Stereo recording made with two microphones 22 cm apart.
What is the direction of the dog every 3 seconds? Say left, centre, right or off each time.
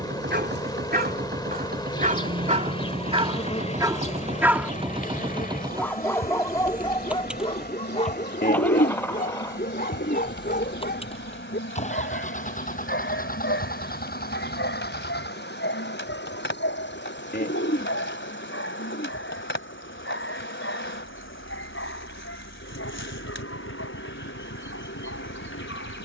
right, centre, left, left, left, left, left, left, left.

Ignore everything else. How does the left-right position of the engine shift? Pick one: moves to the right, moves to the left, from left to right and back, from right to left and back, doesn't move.
moves to the left.